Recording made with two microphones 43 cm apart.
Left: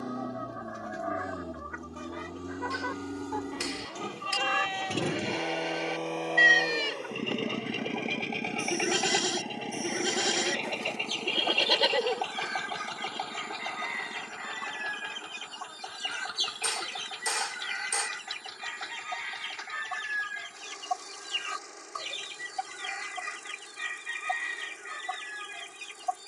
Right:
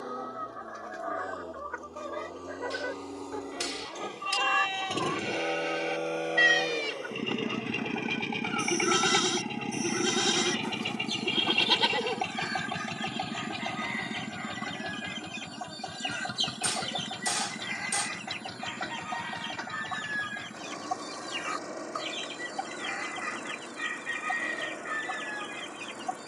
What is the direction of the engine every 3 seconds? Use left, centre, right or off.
left, left, centre, right, right, right, right, right, right.